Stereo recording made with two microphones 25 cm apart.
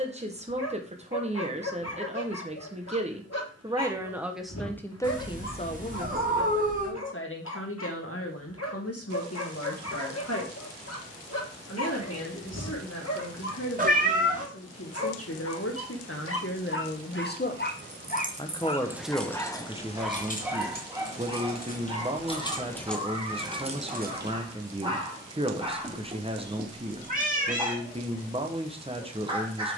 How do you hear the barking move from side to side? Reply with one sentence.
You can hear the barking move to the right.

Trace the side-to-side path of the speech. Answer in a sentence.
You can hear the speech move from right to left and back again.